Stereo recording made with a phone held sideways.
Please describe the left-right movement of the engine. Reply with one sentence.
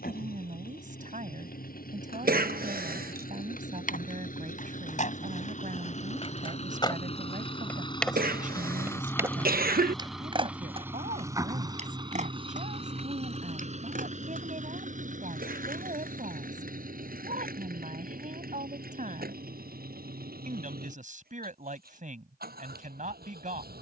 You can hear the engine move from left to right.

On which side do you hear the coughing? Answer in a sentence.
In this clip you hear the coughing on the right.